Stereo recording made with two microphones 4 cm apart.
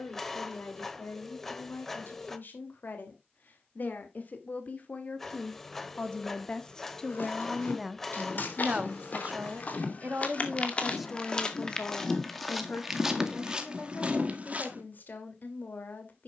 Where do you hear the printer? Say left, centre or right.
centre.